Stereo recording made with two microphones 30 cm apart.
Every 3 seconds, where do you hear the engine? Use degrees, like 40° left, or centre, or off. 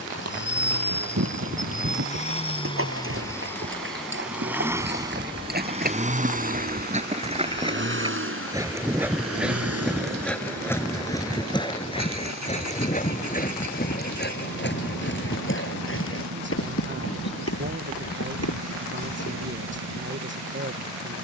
30° left, 10° right, 40° right, 50° right, 70° right, 70° right, 70° right.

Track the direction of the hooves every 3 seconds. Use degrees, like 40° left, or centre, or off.
50° right, 40° right, 20° right, 10° left, 30° left, 50° left, 50° left.